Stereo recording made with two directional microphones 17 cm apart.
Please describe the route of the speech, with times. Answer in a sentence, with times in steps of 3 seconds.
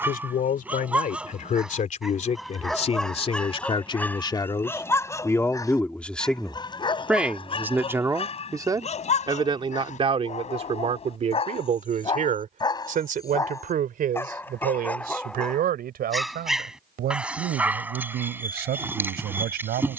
You can hear the speech on the left from 0 s, in the centre from 6 s and on the right from 9 s.